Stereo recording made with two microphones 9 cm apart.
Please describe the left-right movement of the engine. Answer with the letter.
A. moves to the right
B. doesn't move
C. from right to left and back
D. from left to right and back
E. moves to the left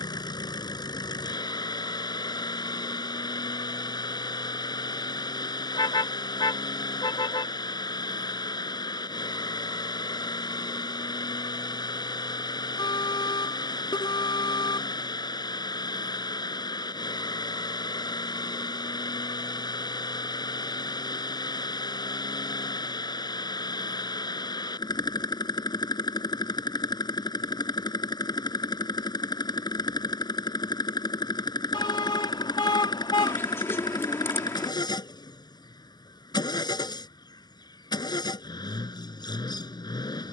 B.